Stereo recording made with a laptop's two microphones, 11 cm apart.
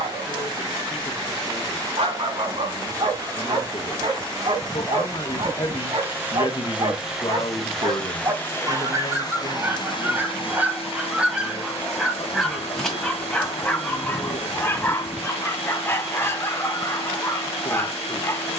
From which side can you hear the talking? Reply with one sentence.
You can hear the talking on the left.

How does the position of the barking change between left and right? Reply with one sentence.
You can hear the barking move from right to left.